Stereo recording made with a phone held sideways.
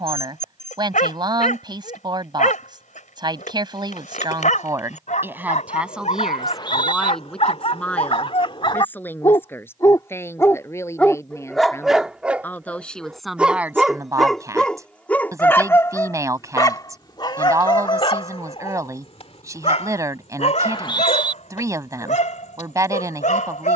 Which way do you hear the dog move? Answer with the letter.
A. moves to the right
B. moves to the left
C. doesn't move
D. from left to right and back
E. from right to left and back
D.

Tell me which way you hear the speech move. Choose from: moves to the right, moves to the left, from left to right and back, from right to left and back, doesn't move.
from right to left and back.